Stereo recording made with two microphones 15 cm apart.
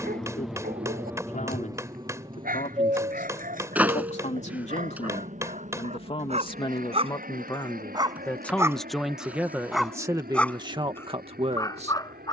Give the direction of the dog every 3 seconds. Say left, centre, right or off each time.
right, right, right, centre.